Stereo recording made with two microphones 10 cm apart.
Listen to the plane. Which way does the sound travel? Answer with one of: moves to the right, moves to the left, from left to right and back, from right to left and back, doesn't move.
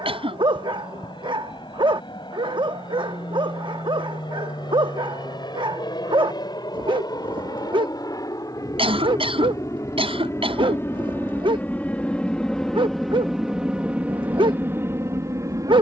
moves to the right.